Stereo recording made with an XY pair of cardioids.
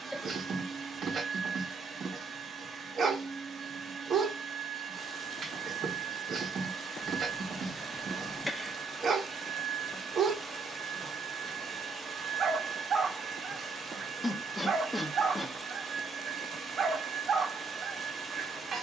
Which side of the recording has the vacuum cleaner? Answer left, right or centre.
right.